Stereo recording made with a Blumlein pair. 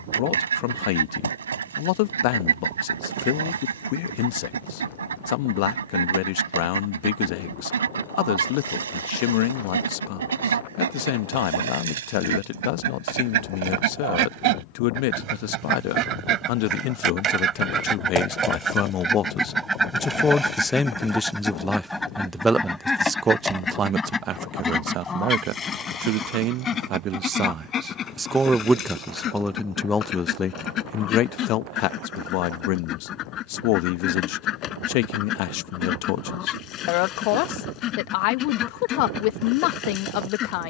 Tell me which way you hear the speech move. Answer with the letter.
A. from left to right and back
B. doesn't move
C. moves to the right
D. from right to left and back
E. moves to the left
A.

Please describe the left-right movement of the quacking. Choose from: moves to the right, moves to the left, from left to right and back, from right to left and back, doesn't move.
moves to the left.